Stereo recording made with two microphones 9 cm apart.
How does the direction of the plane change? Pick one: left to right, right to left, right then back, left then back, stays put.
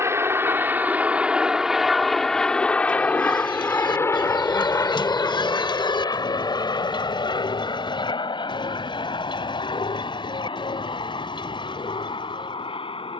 right to left.